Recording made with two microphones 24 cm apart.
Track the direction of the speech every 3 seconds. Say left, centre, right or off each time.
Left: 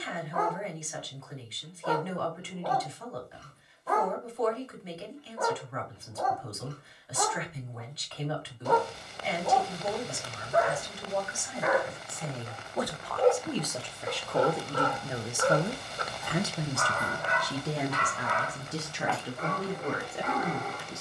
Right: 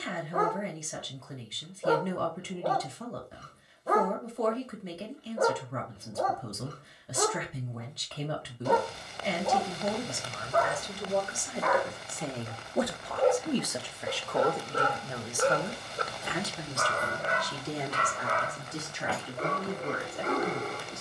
right, right, right, right, centre, left, left.